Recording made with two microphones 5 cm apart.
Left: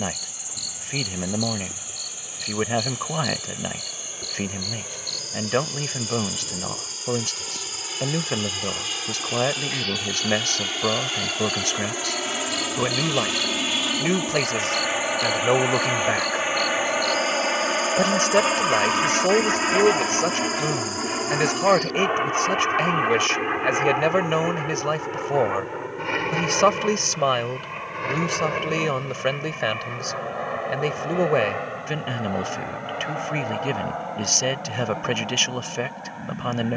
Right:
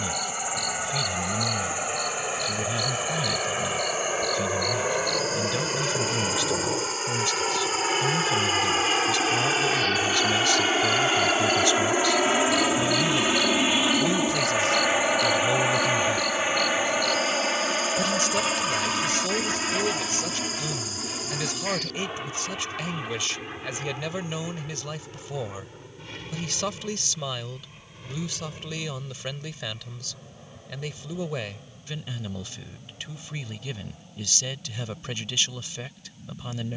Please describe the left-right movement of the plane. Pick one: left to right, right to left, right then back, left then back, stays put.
right to left.